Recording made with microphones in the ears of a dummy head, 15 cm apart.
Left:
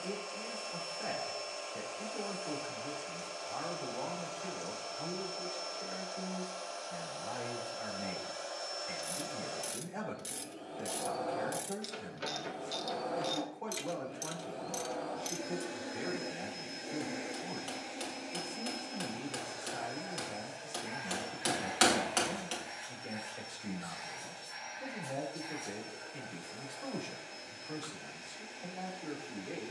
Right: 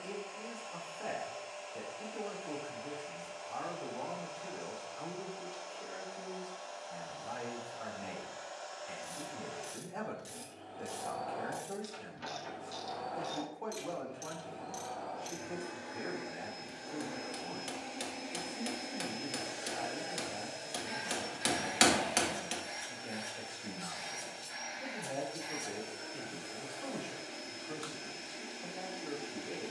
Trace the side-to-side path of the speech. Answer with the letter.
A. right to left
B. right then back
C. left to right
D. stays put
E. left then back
D.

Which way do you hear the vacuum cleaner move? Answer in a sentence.
In this clip you hear the vacuum cleaner move from left to right.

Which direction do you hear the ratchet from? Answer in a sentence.
You can hear the ratchet on the left.